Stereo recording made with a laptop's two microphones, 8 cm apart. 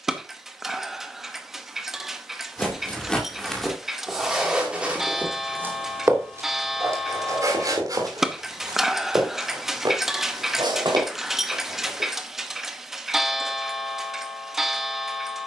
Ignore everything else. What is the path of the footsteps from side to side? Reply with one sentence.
In this clip you hear the footsteps move from left to right.